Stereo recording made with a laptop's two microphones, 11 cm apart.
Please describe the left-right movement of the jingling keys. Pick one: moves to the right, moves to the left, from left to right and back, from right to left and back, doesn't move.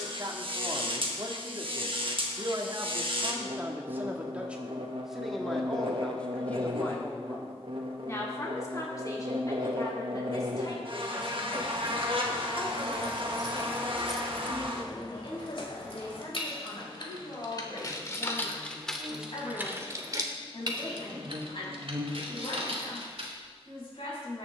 from right to left and back.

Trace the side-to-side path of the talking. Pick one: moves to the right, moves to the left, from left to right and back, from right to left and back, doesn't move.
moves to the left.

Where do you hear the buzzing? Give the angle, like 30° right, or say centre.
50° right.